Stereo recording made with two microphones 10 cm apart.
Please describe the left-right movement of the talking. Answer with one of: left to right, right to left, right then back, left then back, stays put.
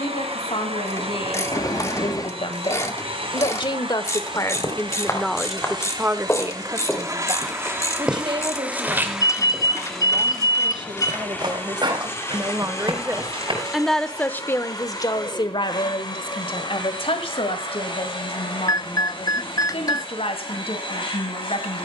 right then back.